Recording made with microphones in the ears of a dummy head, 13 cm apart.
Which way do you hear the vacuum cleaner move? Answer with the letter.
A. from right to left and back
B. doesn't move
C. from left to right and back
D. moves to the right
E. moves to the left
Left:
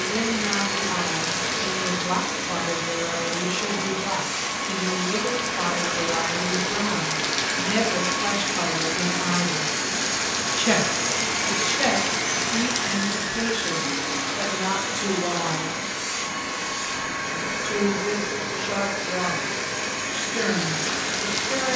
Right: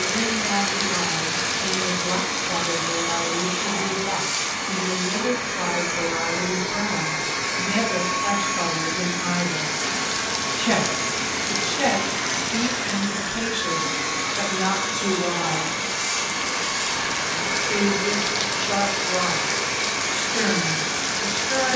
A.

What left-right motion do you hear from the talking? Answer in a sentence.
In this clip you hear the talking go from the left side to the right.